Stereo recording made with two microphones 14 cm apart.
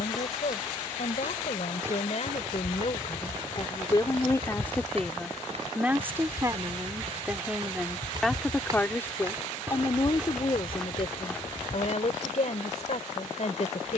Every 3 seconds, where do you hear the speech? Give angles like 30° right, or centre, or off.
60° left, 20° left, 10° right, 40° left, 60° left.